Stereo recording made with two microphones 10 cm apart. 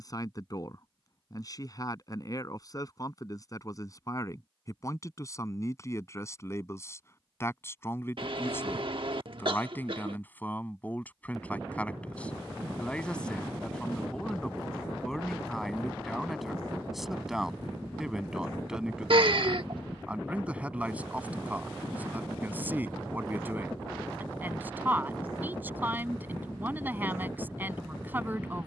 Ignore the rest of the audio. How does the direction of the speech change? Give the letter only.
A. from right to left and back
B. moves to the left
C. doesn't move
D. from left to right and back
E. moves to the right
E.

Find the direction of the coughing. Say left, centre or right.
right.